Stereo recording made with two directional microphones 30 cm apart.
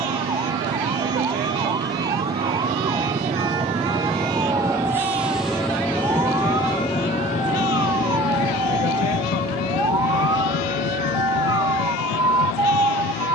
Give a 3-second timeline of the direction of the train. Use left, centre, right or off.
right, centre, left, left, left.